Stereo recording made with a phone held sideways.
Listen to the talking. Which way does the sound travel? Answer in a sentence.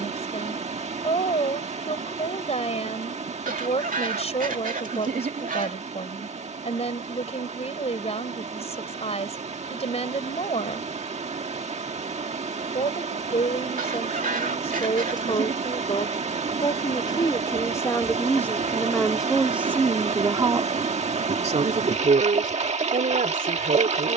You can hear the talking move from left to right.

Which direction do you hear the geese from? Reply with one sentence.
In this clip you hear the geese on the right.